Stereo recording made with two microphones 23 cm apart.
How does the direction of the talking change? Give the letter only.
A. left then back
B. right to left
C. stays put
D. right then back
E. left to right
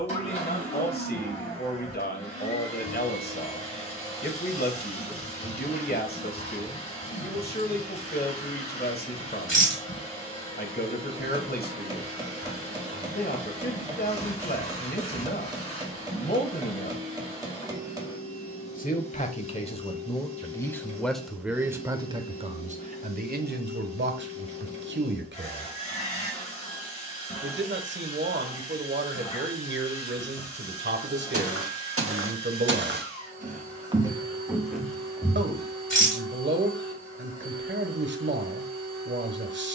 E.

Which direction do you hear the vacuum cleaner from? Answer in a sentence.
In this clip you hear the vacuum cleaner on the left.